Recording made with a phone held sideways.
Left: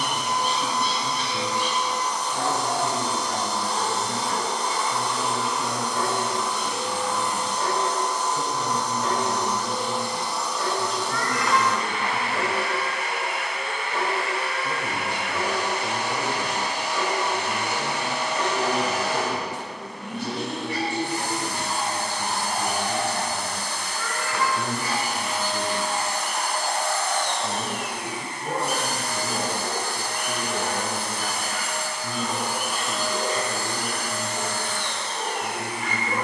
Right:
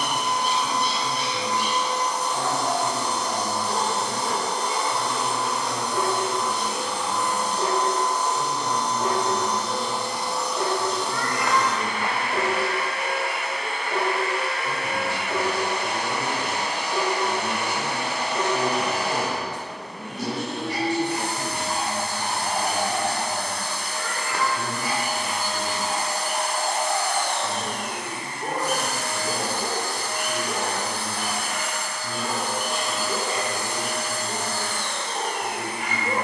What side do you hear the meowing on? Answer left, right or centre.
right.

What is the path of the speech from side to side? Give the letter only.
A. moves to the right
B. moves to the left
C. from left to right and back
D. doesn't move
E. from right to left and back
C.